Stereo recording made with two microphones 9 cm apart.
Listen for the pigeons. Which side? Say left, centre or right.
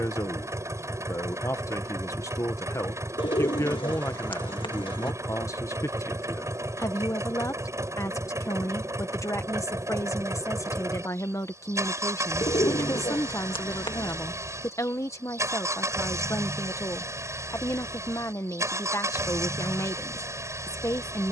left.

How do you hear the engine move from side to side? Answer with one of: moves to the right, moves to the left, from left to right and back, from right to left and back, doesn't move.
doesn't move.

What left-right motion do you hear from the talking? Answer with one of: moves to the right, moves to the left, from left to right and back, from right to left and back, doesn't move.
doesn't move.